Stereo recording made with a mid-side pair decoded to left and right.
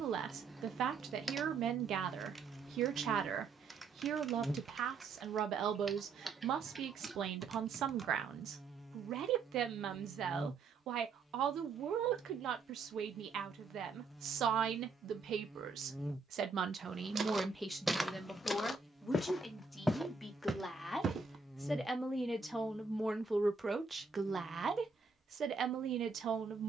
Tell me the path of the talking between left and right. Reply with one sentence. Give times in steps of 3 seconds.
In this clip you hear the talking on the right from 0 s, in the centre from 18 s and on the right from 24 s.